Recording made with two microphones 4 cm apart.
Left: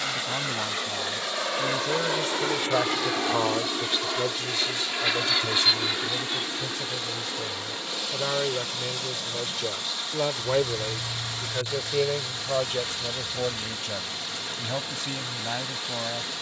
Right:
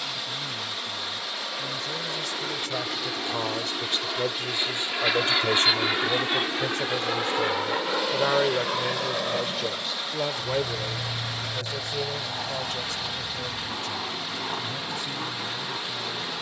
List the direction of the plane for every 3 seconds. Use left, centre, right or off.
left, centre, right, right, right, right.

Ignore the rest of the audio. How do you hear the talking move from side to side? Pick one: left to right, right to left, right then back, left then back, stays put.
right then back.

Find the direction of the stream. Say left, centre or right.
centre.